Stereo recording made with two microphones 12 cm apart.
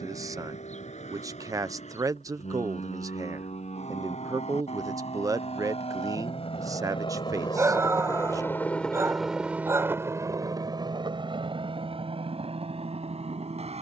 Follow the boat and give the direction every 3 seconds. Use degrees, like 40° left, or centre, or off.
80° left, 70° left, 40° left, 30° right, 60° right.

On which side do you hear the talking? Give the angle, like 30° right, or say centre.
30° right.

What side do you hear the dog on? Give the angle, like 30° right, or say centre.
20° right.